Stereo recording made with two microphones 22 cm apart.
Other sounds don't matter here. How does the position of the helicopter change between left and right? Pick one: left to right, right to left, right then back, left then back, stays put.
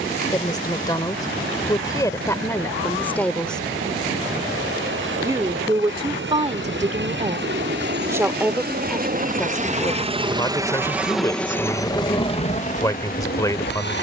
right to left.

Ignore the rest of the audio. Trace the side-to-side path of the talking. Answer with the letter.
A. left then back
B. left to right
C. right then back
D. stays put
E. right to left
C.